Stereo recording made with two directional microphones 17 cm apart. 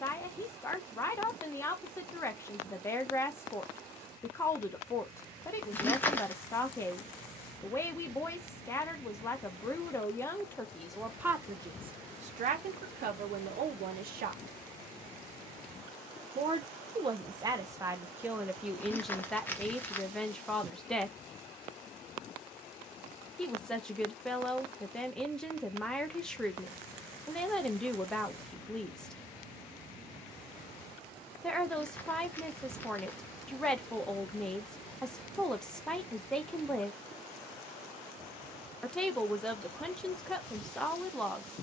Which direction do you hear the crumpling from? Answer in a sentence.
In this clip you hear the crumpling in the centre.